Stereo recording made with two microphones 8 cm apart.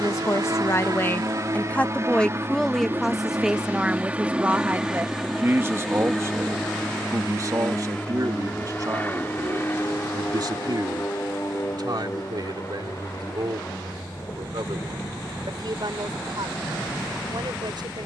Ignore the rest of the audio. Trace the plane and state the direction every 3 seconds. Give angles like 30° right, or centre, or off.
40° right, 10° right, 10° left, 30° left, 40° left, 40° left.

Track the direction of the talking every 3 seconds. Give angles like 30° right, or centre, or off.
20° left, 20° right, 40° right, 50° right, 60° right, 60° right.